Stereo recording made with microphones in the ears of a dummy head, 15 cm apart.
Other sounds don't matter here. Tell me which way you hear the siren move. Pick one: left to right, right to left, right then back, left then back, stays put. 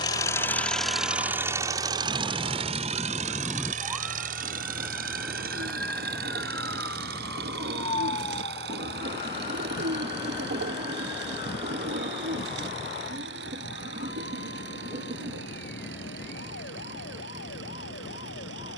right to left.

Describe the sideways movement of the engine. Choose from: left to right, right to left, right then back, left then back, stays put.
left to right.